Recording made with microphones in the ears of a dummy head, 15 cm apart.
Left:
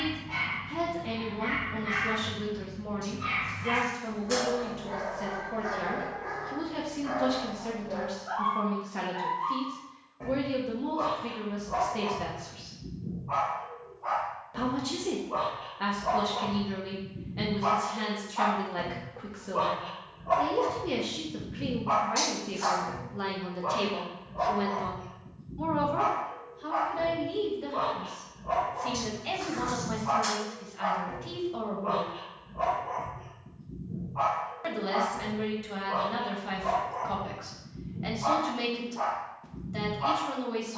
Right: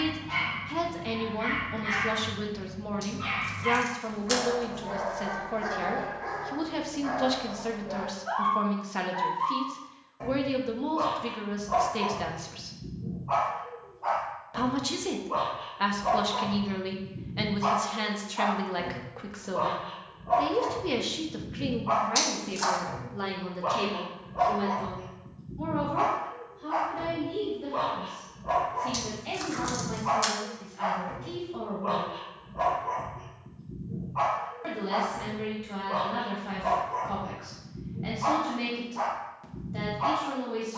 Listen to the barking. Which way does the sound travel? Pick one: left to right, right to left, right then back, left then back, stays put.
left then back.